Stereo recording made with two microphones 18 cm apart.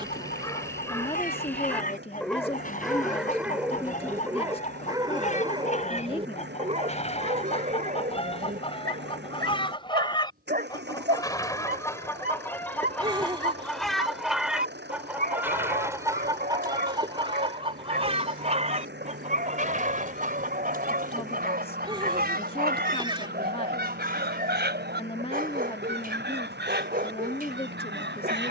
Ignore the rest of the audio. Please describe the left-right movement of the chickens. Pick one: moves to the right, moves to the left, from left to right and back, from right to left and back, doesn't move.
moves to the right.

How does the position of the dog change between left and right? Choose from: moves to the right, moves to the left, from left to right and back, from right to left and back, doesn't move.
moves to the right.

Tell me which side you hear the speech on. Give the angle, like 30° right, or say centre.
30° left.